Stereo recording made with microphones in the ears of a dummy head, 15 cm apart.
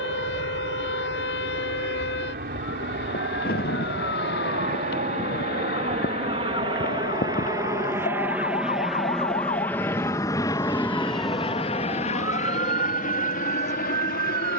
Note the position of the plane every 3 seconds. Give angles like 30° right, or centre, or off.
60° right, 50° right, 20° right, 20° left, 50° left.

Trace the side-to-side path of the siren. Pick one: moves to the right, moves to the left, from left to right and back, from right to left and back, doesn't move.
moves to the right.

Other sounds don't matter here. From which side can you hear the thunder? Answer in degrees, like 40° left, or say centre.
60° left.